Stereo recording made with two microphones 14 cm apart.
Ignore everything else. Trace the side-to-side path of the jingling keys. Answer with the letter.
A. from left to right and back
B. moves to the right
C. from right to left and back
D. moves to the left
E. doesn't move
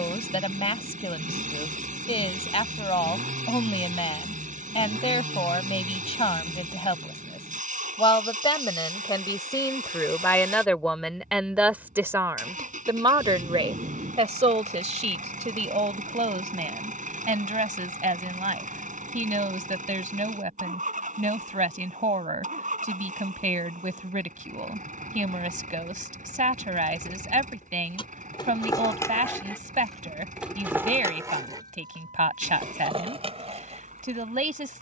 B.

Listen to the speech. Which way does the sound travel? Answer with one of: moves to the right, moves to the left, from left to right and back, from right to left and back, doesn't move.
moves to the right.